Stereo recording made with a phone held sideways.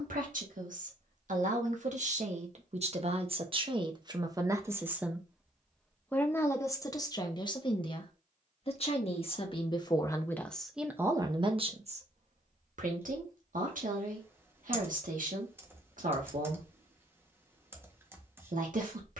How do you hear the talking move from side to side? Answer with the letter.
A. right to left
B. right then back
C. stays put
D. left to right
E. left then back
E.